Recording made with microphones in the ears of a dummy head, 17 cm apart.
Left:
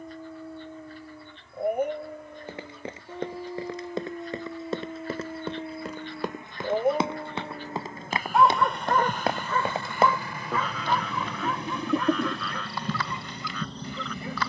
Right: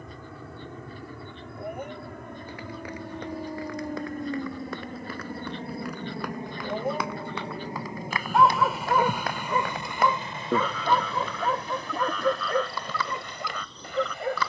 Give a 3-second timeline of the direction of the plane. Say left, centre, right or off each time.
right, right, right, centre, left.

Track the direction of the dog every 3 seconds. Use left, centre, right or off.
left, left, centre, right, right.